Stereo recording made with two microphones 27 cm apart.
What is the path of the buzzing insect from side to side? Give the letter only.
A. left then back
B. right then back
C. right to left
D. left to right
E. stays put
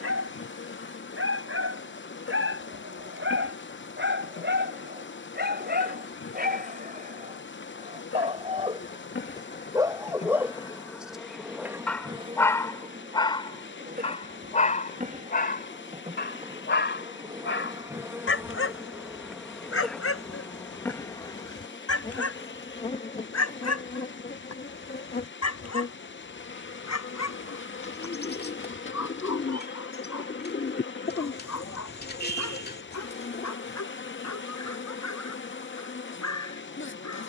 B.